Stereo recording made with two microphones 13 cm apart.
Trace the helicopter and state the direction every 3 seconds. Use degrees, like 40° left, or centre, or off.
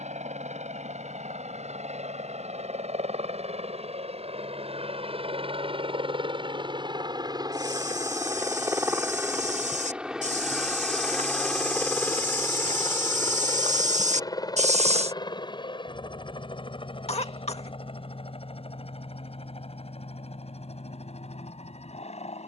70° right, 60° right, 30° right, centre, 20° left, 40° left, 50° left, 50° left.